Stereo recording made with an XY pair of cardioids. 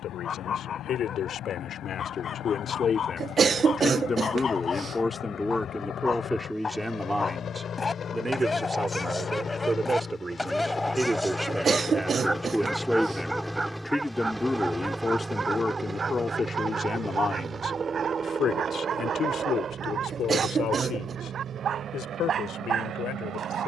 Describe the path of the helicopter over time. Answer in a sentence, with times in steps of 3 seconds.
You can hear the helicopter on the left from 0 s, in the centre from 12 s and on the right from 15 s.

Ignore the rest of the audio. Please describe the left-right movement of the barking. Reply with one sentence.
You can hear the barking travel towards the right.